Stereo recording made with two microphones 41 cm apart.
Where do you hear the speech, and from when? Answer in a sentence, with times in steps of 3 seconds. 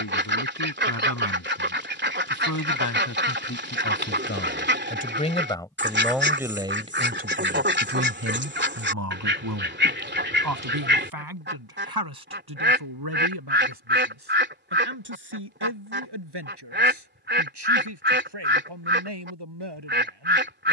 In this clip you hear the speech on the left from 0 s and on the right from 6 s.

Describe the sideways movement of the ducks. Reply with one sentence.
In this clip you hear the ducks stay put.